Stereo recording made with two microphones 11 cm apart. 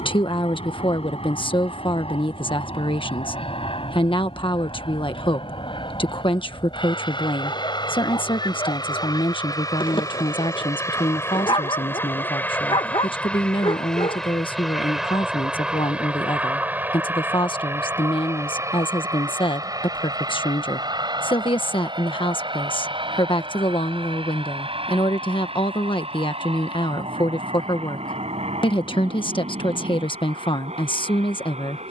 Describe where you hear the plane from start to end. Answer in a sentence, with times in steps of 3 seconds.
You can hear the plane on the left from 0 s, in the centre from 12 s and on the right from 18 s.